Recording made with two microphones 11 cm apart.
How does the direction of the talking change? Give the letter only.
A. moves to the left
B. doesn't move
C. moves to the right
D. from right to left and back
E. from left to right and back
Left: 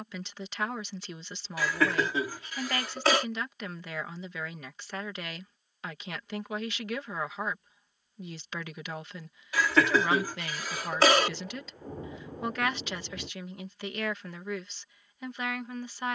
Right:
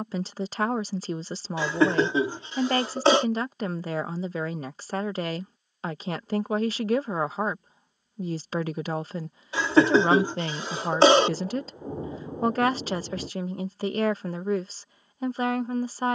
B.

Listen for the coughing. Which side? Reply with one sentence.
In this clip you hear the coughing on the right.